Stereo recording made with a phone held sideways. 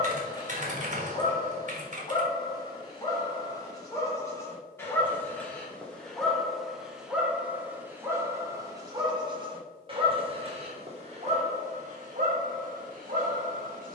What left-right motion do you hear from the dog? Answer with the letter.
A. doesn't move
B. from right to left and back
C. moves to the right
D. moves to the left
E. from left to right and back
C.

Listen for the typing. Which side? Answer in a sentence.
You can hear the typing on the right.